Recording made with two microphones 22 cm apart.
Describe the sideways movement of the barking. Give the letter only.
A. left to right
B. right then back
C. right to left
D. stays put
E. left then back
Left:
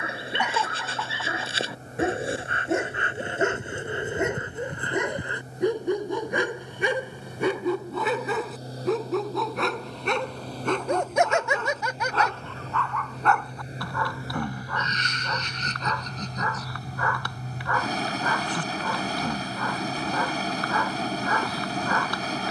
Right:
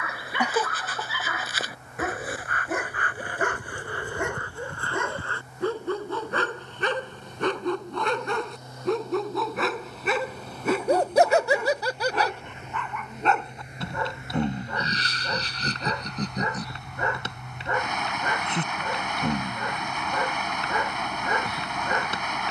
A.